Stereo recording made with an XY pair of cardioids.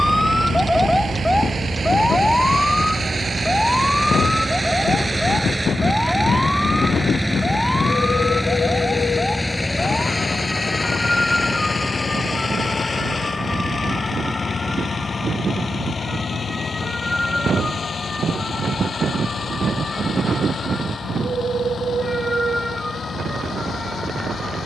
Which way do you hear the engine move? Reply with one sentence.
In this clip you hear the engine move from right to left.